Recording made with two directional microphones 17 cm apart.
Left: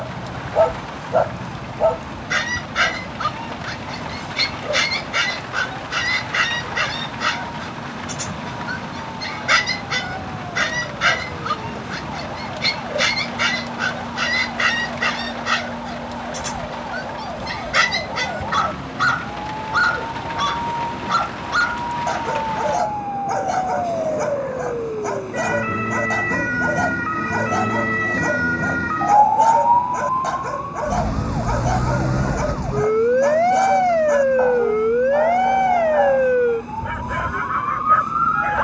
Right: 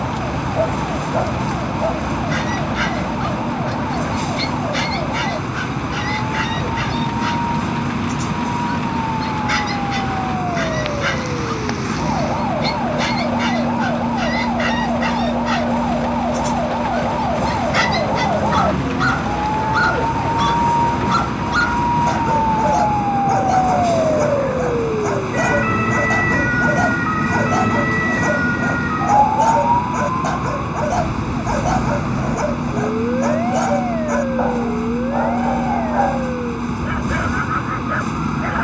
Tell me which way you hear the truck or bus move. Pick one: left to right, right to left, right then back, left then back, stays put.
stays put.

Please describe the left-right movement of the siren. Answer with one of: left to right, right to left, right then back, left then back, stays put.
right to left.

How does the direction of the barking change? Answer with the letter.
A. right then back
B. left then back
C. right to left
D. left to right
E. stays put
D.